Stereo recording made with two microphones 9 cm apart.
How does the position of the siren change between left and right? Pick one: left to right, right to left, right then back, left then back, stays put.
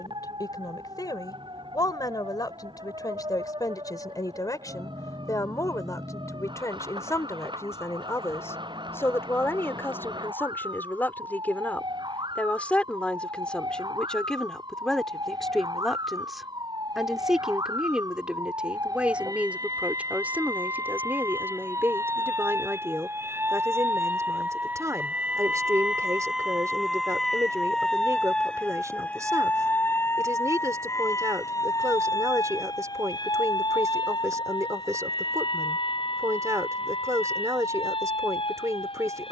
right to left.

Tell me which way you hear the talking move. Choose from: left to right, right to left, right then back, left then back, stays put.
left to right.